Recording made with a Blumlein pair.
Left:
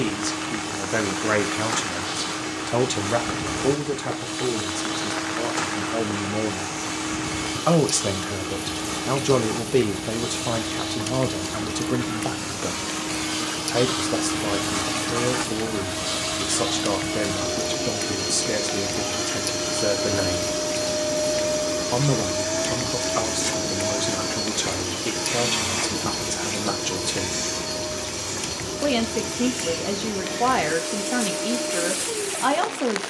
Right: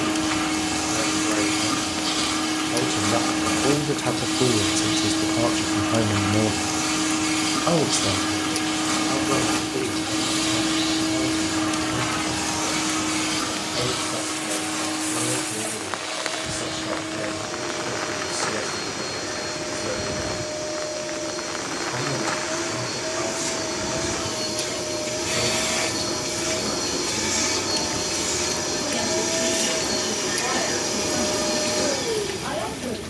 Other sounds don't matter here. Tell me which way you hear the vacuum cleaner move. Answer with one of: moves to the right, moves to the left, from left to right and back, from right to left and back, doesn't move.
from right to left and back.